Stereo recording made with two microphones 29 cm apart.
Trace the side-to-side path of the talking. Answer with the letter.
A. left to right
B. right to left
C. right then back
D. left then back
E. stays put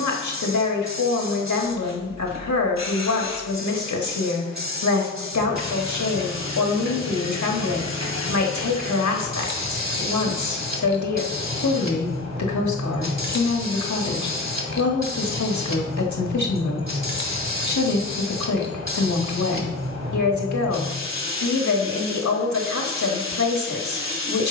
E.